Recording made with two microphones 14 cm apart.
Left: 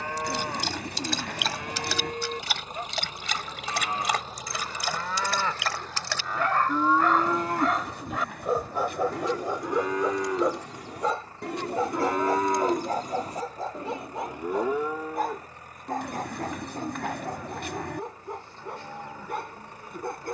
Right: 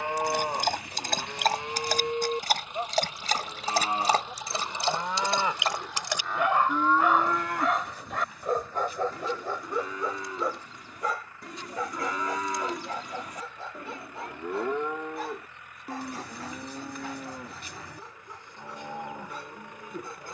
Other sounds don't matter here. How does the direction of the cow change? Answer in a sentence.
In this clip you hear the cow go left and come back.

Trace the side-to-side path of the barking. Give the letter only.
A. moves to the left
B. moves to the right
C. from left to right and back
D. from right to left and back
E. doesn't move
A.